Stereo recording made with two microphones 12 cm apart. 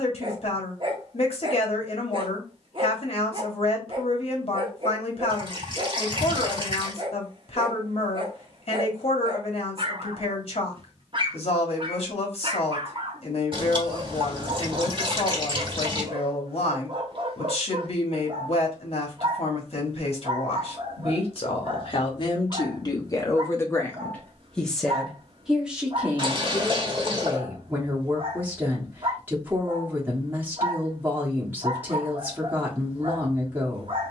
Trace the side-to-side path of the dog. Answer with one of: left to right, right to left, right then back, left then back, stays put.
stays put.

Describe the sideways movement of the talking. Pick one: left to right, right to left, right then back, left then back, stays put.
left to right.